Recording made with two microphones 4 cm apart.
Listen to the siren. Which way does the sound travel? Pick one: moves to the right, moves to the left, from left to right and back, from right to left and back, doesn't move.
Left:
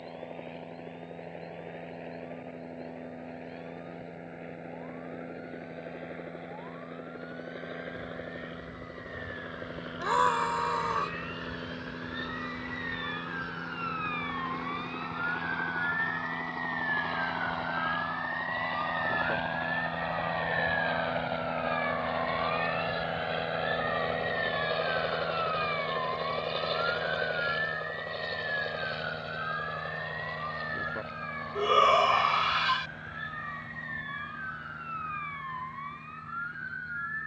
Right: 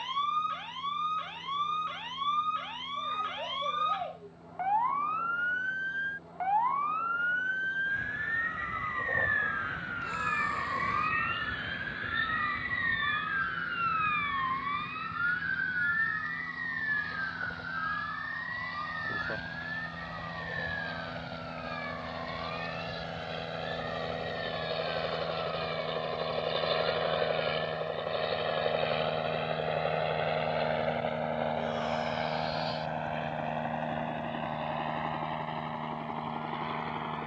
moves to the left.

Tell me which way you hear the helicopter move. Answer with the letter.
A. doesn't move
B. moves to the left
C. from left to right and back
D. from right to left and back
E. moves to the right
E.